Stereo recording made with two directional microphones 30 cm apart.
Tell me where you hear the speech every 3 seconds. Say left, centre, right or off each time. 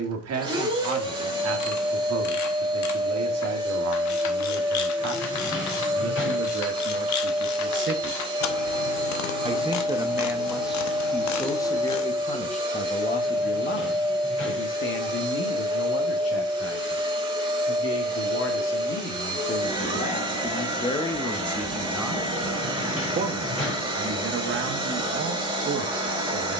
right, right, right, centre, left, left, left, centre, right.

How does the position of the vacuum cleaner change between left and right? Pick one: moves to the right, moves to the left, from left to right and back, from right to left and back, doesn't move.
doesn't move.